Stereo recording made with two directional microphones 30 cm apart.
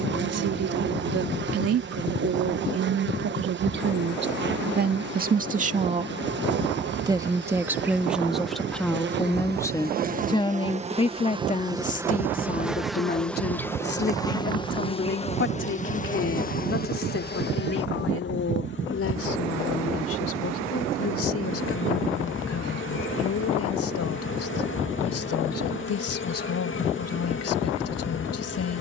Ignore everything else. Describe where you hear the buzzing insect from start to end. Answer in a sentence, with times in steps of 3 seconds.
You can hear the buzzing insect on the right from 0 s, in the centre from 12 s and on the left from 15 s.